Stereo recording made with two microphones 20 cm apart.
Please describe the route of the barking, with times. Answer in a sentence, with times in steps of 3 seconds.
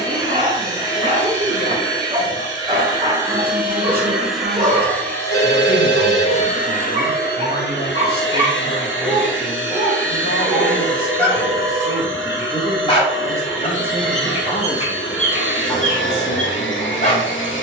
You can hear the barking on the right from 0 s, in the centre from 9 s and on the left from 12 s.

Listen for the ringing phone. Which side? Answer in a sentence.
You can hear the ringing phone on the right.